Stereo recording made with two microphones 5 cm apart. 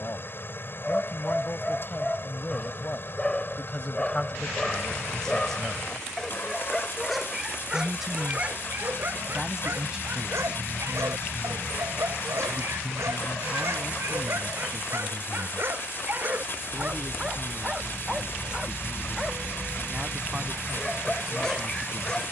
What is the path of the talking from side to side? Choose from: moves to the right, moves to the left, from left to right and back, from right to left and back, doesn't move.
moves to the right.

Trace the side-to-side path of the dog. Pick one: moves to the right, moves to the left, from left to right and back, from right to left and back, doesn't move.
from left to right and back.